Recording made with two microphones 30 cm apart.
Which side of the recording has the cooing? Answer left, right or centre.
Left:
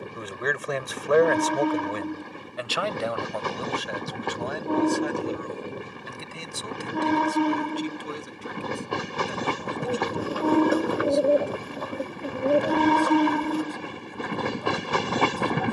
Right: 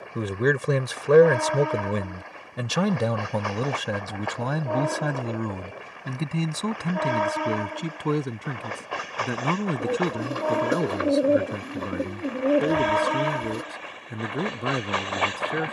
right.